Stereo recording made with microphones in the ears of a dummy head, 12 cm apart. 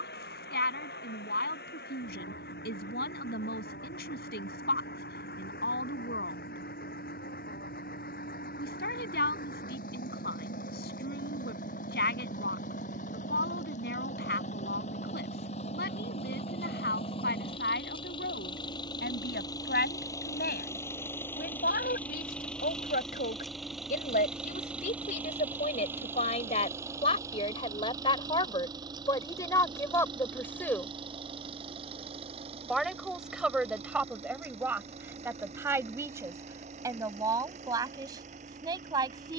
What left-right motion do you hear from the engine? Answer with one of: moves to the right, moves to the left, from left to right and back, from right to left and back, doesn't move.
moves to the right.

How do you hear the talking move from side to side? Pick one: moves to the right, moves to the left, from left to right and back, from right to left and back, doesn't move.
moves to the right.